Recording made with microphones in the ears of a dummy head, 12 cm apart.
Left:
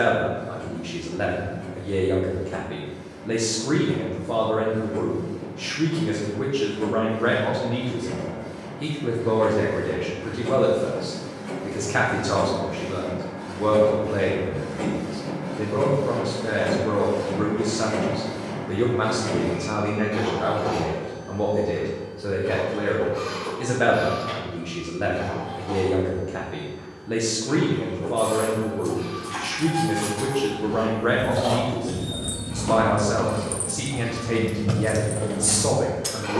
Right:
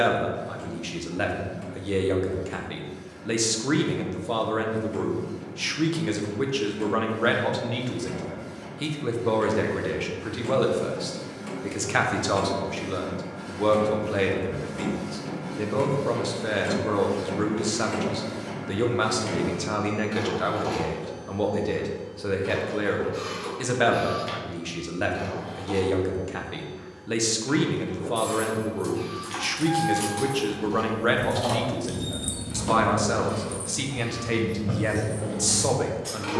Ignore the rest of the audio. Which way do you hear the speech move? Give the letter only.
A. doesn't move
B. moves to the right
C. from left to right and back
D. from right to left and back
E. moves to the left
A.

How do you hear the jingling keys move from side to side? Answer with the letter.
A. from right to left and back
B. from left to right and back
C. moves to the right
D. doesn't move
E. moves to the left
E.